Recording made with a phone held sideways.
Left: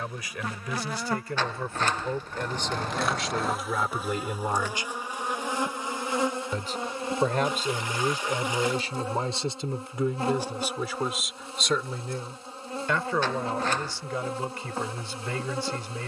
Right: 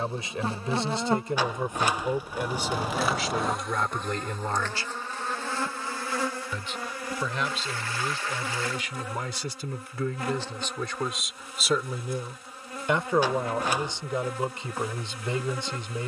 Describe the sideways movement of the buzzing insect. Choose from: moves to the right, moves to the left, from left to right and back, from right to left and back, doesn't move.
moves to the left.